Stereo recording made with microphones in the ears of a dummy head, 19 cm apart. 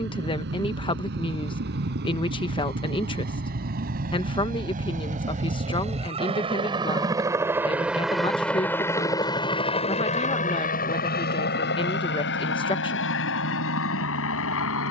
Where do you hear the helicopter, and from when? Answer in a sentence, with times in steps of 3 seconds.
In this clip you hear the helicopter on the right from 0 s, in the centre from 6 s and on the left from 9 s.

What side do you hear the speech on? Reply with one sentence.
In this clip you hear the speech on the left.